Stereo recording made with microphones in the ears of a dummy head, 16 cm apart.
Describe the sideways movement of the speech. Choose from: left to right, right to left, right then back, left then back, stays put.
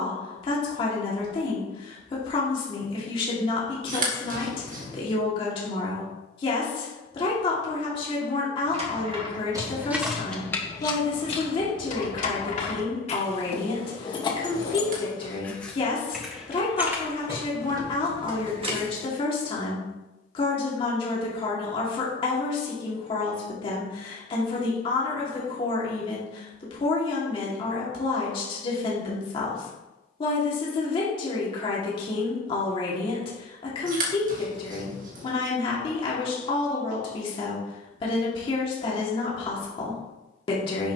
stays put.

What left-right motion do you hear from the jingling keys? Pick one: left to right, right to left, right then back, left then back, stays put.
left then back.